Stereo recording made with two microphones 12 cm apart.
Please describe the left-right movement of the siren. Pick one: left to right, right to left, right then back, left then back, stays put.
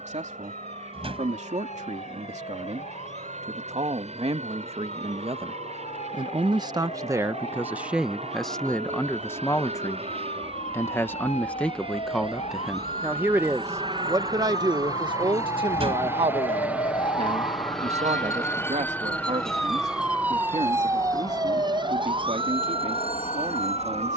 left to right.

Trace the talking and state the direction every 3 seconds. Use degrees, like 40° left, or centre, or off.
70° right, 60° right, 20° right, 20° left, 20° right, 50° right, 70° right, 70° right.